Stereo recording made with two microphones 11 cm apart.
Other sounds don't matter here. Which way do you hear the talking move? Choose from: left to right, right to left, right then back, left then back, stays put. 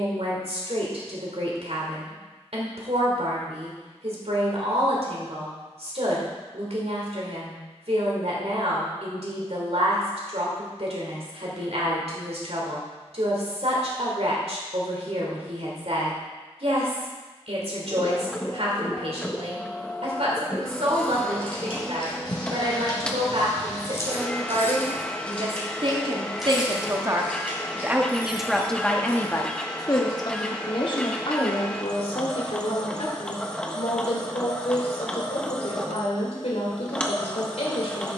right to left.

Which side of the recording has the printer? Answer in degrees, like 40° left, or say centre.
10° left.